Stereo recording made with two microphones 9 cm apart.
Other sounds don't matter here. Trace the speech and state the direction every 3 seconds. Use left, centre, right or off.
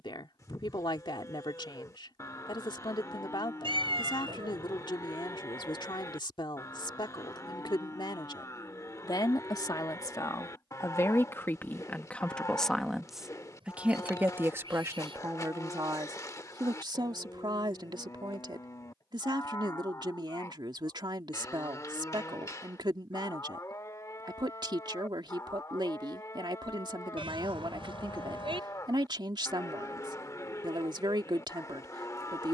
left, left, left, left, centre, right, right, right, right, right, right.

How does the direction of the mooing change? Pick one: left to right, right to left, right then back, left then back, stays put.
stays put.